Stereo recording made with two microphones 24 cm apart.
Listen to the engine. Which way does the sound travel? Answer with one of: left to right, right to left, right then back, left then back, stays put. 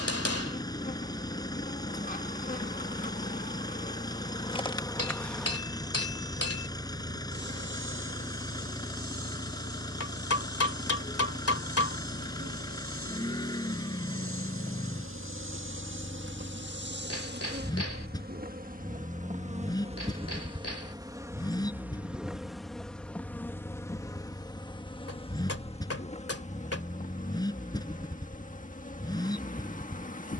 stays put.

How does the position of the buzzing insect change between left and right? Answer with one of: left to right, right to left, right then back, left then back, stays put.
right then back.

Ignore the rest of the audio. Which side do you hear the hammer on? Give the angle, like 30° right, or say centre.
70° left.